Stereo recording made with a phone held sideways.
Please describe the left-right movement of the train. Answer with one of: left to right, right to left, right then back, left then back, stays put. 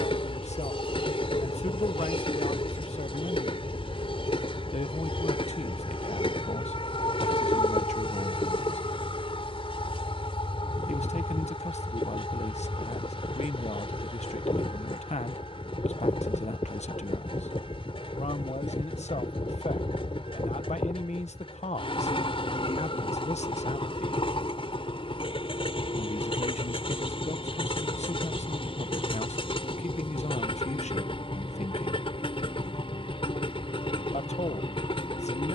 stays put.